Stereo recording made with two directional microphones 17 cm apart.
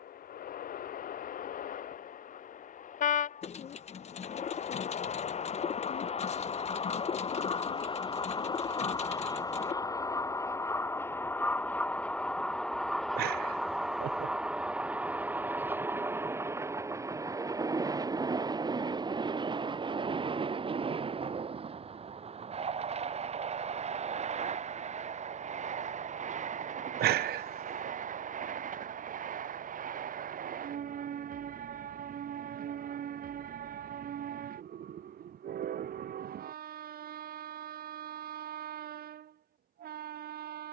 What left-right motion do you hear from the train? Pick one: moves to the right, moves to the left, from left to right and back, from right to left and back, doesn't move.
moves to the right.